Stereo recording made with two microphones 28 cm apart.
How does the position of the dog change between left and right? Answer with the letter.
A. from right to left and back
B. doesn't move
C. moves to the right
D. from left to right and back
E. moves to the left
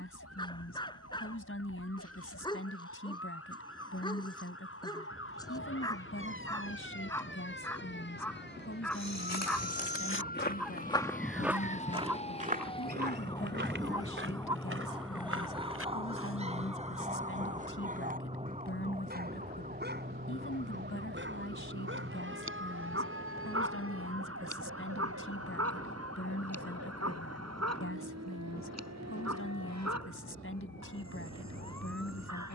C.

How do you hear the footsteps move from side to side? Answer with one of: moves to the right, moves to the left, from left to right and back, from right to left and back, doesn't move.
moves to the right.